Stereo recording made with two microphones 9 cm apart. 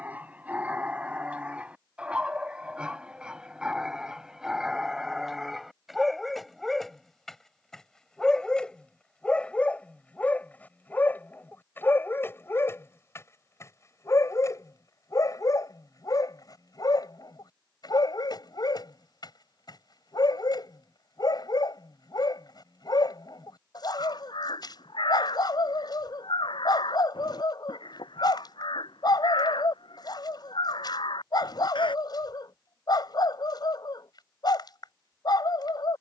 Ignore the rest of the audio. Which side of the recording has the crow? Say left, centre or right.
left.